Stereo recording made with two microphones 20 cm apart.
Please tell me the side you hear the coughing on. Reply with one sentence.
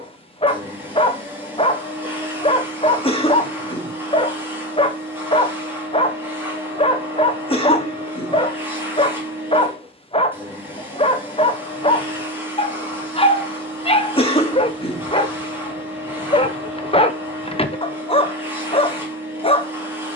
You can hear the coughing on the left.